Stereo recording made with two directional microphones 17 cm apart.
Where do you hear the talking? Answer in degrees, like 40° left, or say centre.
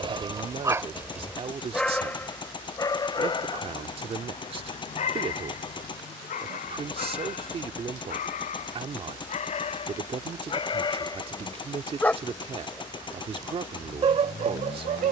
30° right.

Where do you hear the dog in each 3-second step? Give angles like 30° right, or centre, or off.
centre, 40° left, 50° left, 30° left, 30° right.